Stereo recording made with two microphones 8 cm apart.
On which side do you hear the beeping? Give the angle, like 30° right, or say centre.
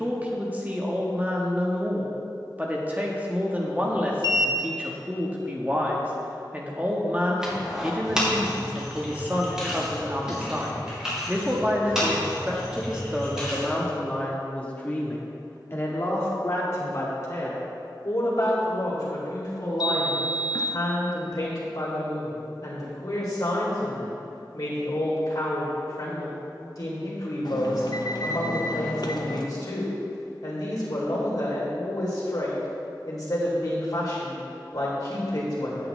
60° left.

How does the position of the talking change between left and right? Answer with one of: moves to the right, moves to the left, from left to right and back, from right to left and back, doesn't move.
moves to the left.